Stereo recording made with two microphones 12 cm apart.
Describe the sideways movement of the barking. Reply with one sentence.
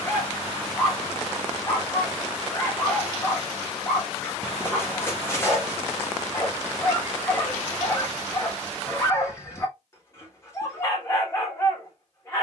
You can hear the barking stay put.